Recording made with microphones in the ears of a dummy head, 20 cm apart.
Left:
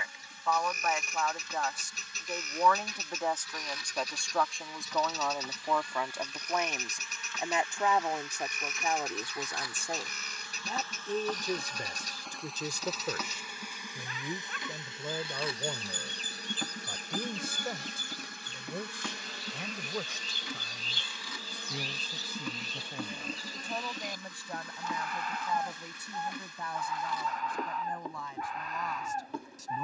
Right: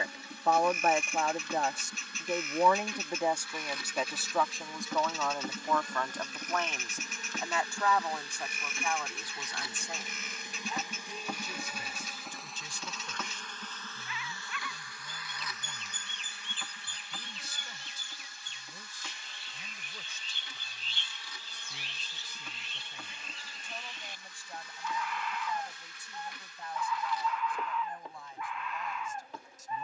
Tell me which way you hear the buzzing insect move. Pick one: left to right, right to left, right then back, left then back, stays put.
right to left.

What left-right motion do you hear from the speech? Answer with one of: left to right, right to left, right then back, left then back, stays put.
right to left.